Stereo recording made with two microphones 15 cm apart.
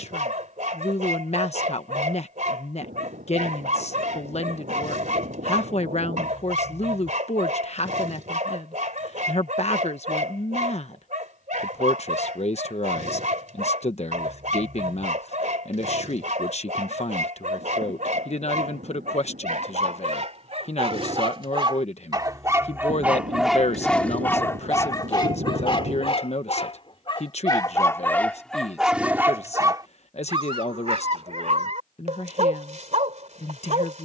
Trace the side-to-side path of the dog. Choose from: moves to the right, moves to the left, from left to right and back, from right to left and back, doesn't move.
from right to left and back.